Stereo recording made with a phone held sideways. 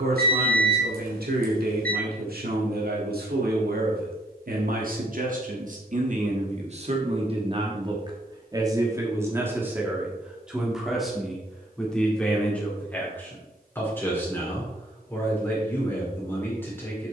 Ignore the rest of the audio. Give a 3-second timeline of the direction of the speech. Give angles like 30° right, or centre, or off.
70° right, 60° right, 40° right, 10° right, 10° left, 10° left.